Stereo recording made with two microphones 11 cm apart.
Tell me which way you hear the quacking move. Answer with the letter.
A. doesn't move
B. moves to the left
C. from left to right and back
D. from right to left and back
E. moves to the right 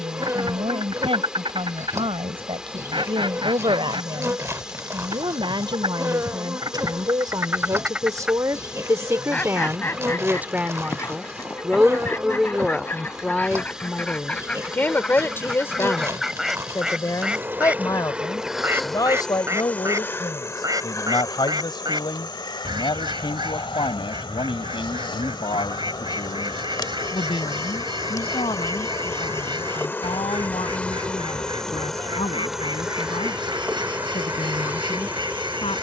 D.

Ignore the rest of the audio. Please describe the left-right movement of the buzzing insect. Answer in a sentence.
In this clip you hear the buzzing insect move from right to left and back again.